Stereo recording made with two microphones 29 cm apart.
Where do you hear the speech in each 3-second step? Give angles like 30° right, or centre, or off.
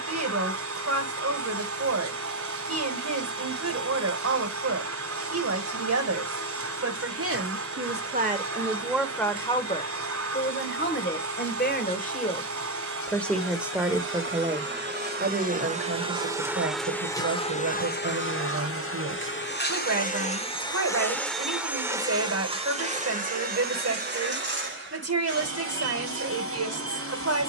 60° right, 60° right, 40° right, 30° left, centre, 50° right, 50° right, 50° right, 50° right.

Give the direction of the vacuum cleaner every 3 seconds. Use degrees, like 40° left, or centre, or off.
50° right, 50° right, 50° right, 50° right, 50° right, centre, 30° left, 20° right, 40° right.